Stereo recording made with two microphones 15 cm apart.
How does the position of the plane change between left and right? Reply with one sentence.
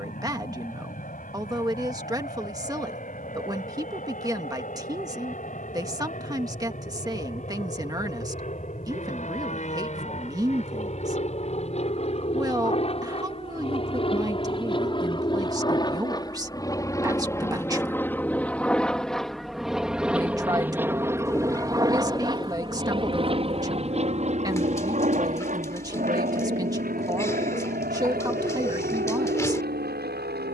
In this clip you hear the plane go from the left side to the right.